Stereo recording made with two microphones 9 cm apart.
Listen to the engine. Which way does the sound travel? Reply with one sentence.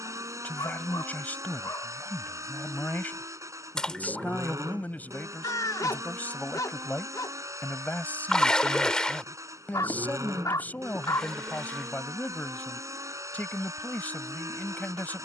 In this clip you hear the engine stay put.